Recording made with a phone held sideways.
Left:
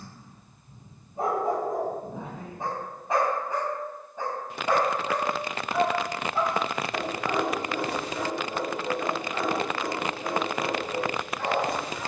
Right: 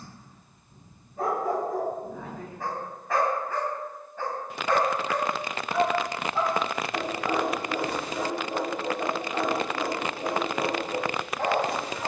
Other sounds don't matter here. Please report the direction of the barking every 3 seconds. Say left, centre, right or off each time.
left, centre, centre, right.